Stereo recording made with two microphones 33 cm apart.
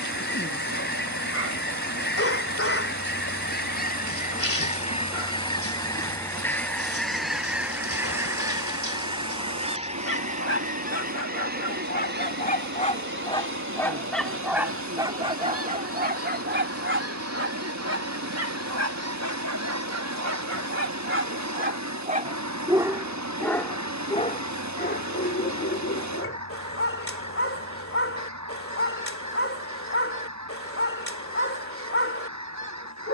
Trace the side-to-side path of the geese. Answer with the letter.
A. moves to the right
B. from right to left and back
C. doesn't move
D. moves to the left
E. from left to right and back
A.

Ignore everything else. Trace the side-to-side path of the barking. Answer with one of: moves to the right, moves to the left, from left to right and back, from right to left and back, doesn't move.
from left to right and back.